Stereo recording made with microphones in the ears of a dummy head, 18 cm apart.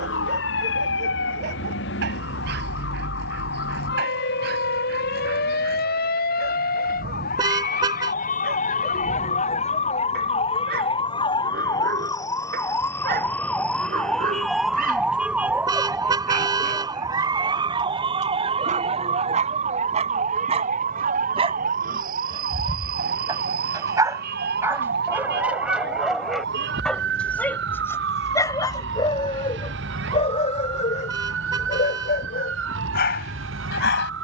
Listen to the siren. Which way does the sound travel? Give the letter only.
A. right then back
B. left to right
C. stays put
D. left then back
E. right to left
B.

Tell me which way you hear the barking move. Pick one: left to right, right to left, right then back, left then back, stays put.
right to left.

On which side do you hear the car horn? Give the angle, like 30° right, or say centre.
20° right.